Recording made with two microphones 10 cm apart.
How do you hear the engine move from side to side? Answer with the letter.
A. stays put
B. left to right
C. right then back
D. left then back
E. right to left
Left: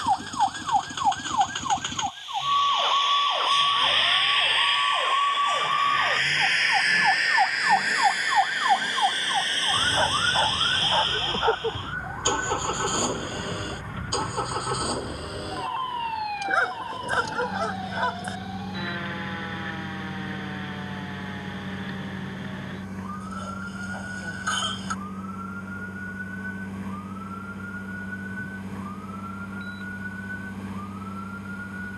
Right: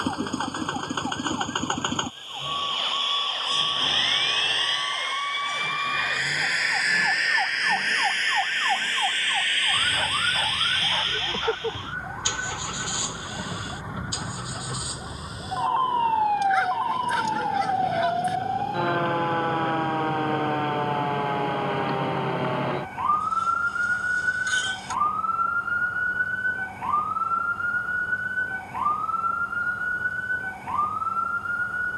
E.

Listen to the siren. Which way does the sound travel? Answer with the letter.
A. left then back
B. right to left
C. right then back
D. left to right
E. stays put
D.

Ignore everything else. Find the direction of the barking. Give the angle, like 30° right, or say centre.
30° left.